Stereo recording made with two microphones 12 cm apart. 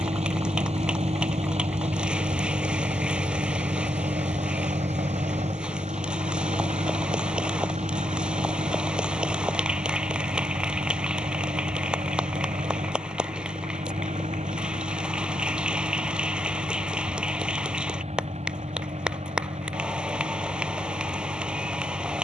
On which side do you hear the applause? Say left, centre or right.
centre.